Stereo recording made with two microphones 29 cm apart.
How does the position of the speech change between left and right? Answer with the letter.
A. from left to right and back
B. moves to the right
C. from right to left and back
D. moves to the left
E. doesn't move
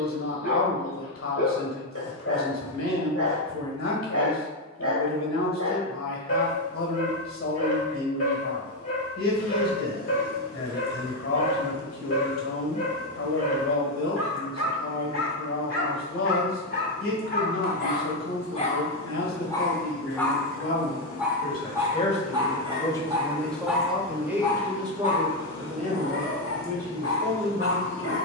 B.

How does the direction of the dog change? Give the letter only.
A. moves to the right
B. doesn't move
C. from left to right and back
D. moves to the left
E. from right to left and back
C.